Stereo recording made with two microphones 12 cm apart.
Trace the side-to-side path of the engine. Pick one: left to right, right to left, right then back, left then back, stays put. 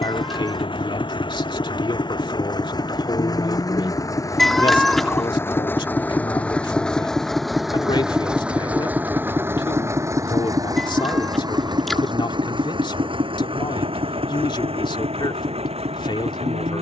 left to right.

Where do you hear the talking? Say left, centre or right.
left.